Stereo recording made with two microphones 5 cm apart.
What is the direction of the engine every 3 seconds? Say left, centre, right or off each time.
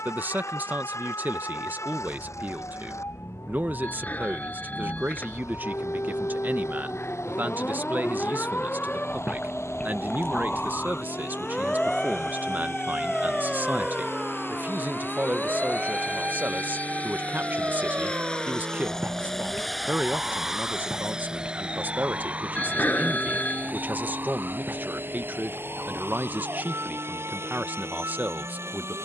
left, left, left, left, left, left, centre, right, right, right.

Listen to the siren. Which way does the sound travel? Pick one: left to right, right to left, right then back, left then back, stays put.
left to right.